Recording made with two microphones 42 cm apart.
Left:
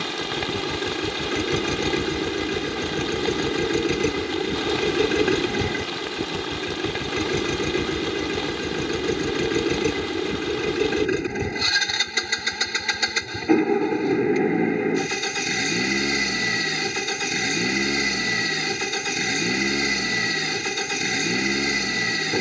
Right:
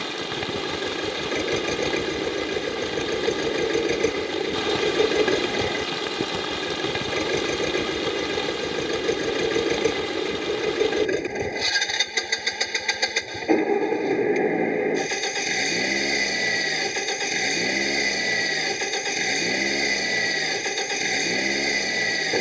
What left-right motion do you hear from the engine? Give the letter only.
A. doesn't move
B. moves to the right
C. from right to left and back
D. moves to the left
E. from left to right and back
A.